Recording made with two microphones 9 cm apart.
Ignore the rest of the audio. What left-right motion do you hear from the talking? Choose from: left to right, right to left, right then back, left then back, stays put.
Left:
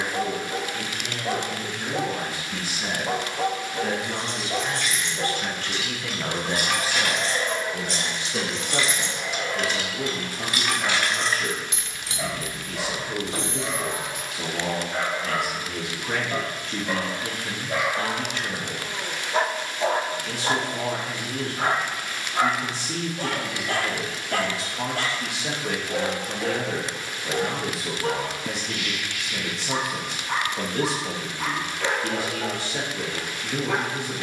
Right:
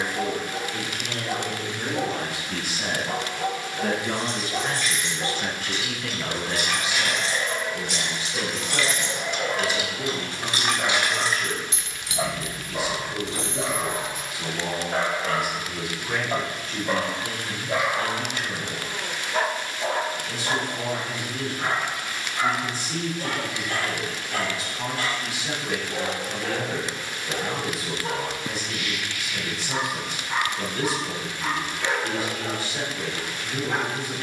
right to left.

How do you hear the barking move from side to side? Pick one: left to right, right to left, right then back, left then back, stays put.
right then back.